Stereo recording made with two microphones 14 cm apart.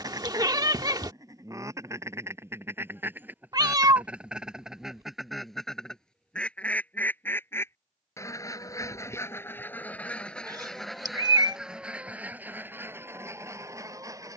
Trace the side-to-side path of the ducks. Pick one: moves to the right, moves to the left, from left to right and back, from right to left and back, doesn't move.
from right to left and back.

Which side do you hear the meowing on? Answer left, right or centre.
right.